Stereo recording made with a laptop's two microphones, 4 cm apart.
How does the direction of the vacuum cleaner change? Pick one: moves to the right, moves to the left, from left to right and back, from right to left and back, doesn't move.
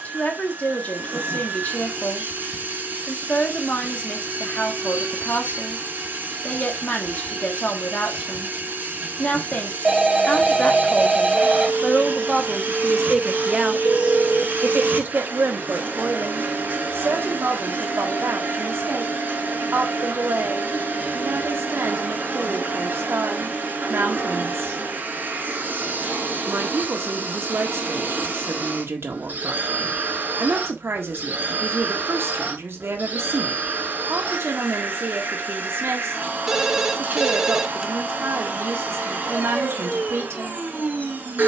doesn't move.